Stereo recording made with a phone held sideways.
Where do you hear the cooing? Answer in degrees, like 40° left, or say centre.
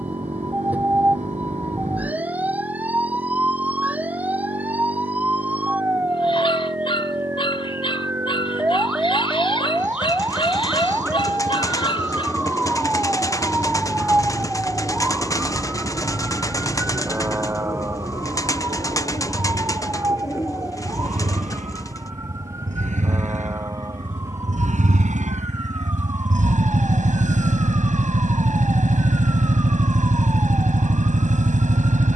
20° left.